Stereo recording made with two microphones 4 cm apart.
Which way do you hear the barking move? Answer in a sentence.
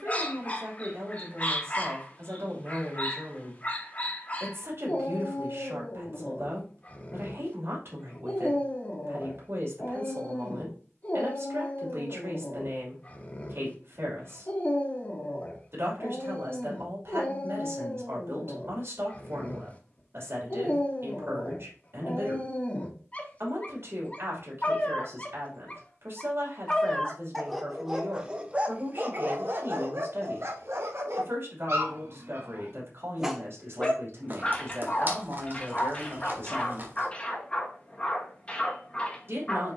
You can hear the barking move from left to right and back again.